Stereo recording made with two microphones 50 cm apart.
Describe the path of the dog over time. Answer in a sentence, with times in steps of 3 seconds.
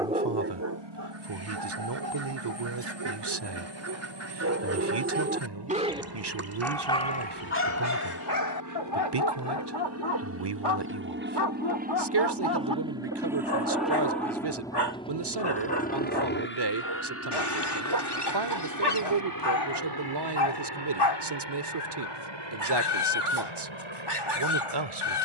You can hear the dog on the right from 0 s and on the left from 6 s.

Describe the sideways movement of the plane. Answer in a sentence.
You can hear the plane go from the right side to the left.